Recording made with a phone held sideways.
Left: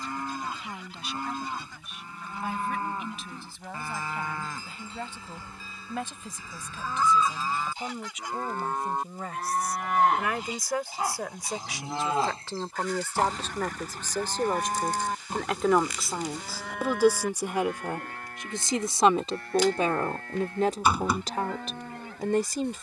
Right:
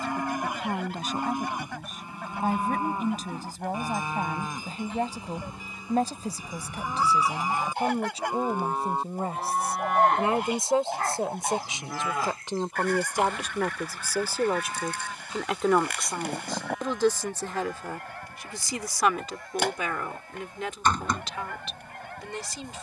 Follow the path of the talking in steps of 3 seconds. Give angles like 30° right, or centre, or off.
50° right, 40° right, 40° right, 30° right, 10° right, 10° left, 30° left, 50° left.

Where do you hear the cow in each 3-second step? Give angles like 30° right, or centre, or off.
20° right, 20° right, 20° right, 10° left, 50° left, 70° left, 80° left, 80° left.